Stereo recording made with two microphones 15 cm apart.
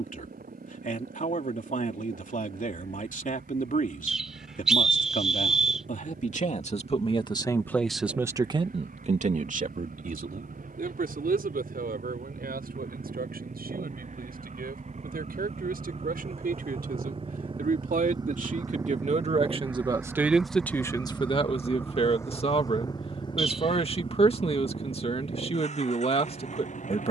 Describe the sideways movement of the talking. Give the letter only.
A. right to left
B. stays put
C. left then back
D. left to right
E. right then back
E.